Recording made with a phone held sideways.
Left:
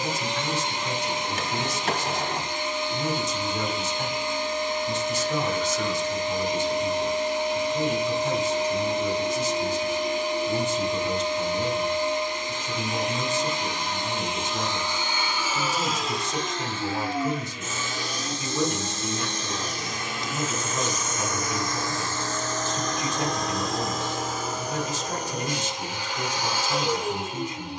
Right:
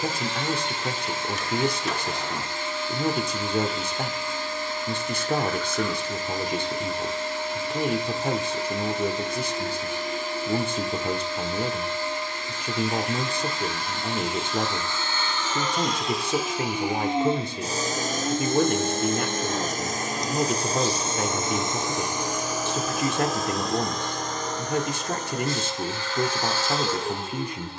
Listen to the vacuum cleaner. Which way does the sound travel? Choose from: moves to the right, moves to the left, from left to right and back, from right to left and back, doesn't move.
from left to right and back.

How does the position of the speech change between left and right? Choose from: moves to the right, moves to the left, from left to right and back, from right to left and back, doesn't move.
doesn't move.